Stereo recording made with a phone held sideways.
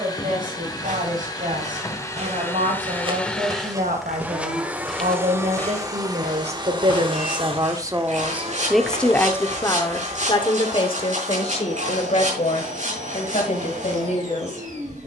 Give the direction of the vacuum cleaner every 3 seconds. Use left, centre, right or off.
left, centre, right, right, right.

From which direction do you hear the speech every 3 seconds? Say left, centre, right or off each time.
right, right, right, left, left.